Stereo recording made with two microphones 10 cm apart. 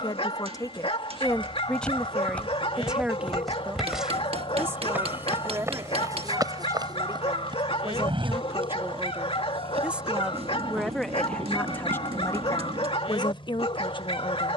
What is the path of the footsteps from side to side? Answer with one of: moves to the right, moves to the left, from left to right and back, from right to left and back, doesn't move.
moves to the right.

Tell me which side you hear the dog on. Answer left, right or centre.
left.